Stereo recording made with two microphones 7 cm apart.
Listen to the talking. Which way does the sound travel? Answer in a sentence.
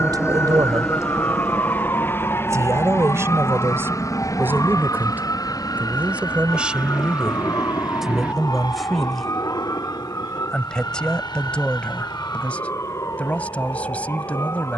You can hear the talking move to the left.